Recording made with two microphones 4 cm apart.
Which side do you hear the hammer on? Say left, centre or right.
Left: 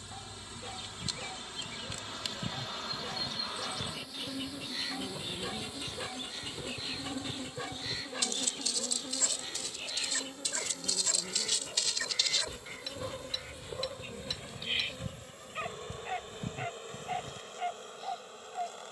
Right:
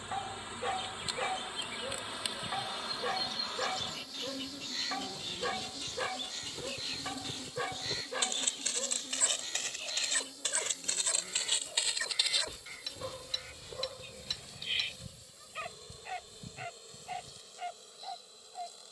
centre.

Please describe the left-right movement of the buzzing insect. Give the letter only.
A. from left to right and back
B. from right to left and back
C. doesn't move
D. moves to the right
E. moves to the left
E.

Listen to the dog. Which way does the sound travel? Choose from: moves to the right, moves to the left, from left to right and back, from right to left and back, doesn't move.
moves to the left.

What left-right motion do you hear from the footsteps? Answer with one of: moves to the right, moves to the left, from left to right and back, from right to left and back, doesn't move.
from left to right and back.